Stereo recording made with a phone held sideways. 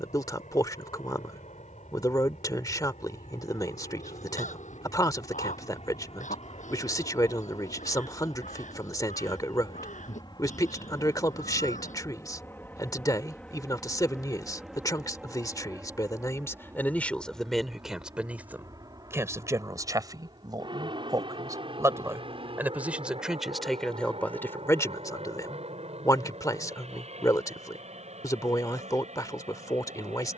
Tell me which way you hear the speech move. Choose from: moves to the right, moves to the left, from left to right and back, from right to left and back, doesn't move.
from left to right and back.